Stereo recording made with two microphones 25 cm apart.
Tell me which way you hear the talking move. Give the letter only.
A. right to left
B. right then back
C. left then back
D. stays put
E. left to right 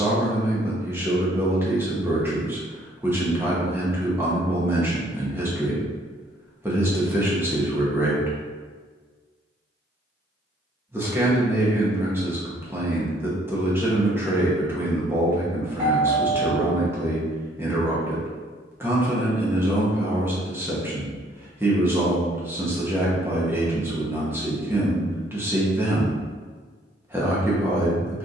D.